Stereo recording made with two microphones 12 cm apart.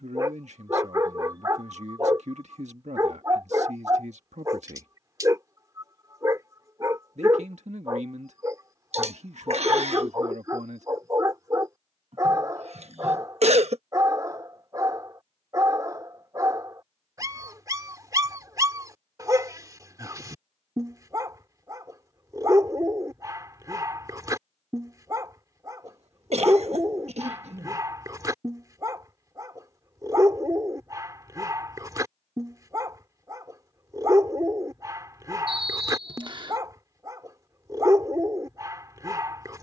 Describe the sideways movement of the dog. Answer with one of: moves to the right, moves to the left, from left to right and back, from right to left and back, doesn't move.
doesn't move.